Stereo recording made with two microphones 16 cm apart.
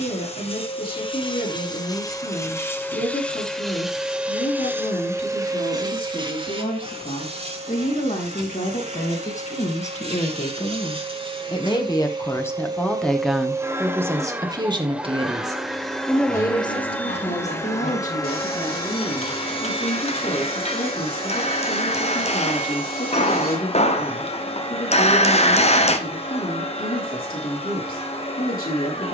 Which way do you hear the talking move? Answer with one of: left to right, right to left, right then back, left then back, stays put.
right then back.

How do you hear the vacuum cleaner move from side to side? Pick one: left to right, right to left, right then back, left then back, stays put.
right then back.